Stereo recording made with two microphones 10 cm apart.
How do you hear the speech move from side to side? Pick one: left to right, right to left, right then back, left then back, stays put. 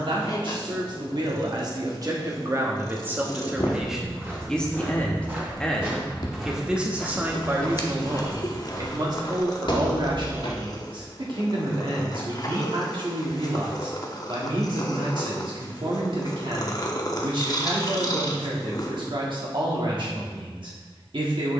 left then back.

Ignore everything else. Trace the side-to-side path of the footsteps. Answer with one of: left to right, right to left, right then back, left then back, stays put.
right to left.